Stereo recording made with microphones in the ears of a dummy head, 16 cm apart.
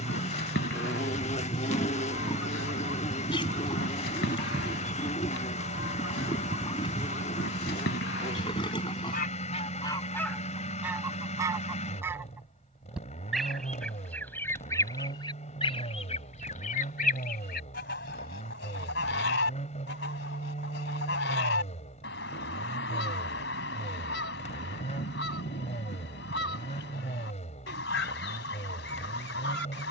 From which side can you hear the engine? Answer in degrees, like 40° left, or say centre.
40° left.